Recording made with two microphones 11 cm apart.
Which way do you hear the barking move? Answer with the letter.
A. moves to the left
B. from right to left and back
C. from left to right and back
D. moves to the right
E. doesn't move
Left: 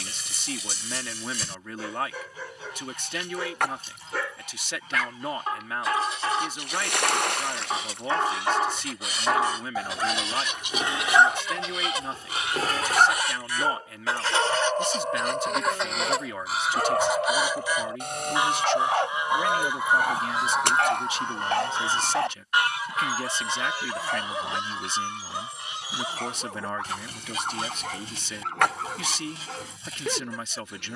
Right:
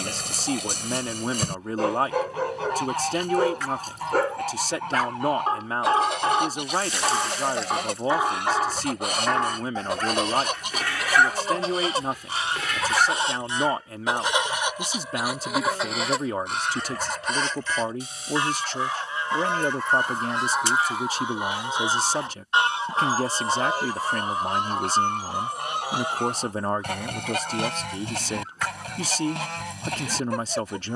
A.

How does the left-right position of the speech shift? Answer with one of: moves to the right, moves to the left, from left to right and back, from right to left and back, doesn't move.
doesn't move.